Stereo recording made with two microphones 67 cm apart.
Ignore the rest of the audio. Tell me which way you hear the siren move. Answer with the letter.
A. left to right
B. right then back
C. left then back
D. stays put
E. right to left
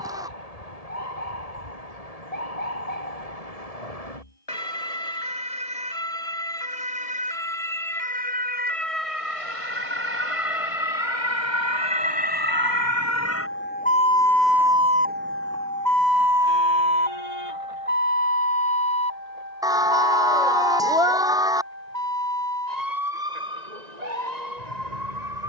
A.